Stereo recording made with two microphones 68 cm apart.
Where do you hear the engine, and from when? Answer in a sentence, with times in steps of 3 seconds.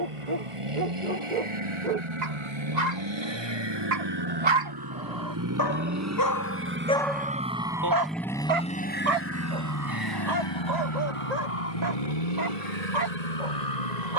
In this clip you hear the engine on the right from 0 s, in the centre from 6 s and on the left from 9 s.